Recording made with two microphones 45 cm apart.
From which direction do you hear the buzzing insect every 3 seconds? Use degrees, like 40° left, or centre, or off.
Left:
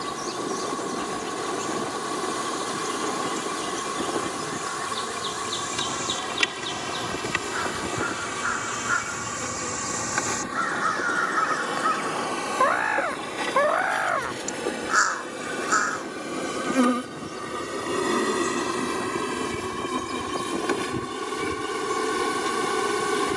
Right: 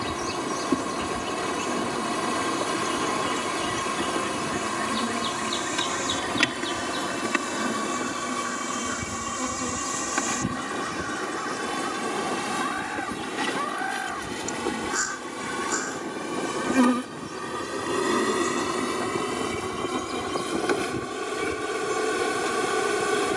70° right, 70° right, 60° right, 50° right, 30° right, 10° right, 10° left, 10° left.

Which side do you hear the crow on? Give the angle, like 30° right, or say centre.
80° left.